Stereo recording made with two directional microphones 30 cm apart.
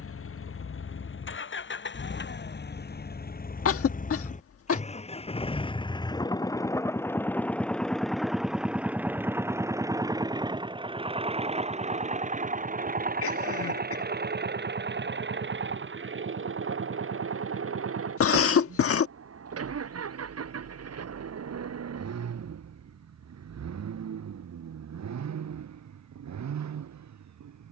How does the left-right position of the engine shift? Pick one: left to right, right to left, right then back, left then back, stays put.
left to right.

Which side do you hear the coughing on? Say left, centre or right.
left.